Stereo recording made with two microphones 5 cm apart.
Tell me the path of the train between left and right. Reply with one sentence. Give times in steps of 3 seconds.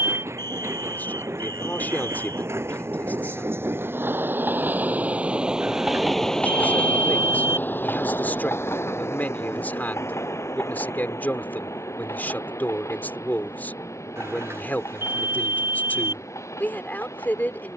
You can hear the train on the right from 0 s and on the left from 6 s.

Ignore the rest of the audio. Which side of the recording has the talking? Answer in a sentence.
You can hear the talking on the left.